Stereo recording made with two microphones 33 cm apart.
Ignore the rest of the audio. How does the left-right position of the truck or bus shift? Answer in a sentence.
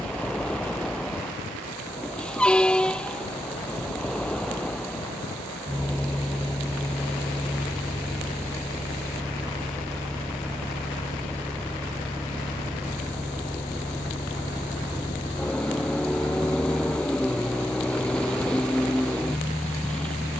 You can hear the truck or bus stay in one place.